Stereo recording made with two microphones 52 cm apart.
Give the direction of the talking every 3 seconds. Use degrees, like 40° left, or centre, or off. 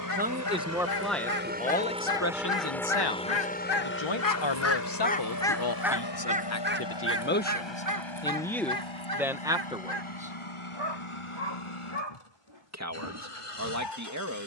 10° left, 50° left, 20° left, 10° right, 30° right.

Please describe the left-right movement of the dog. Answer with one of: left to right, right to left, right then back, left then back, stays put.
left to right.